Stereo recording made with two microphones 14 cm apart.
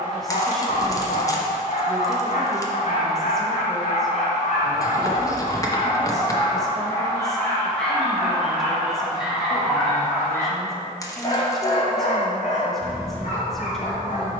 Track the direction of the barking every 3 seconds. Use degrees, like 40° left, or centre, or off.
70° left, 60° left, 10° left, 20° left, 70° left.